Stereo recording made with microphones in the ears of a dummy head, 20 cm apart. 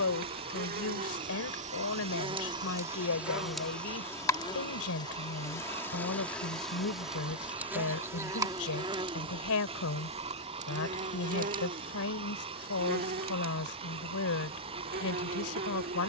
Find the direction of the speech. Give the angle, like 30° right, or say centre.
70° left.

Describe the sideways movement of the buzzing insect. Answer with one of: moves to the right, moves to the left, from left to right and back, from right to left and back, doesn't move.
from right to left and back.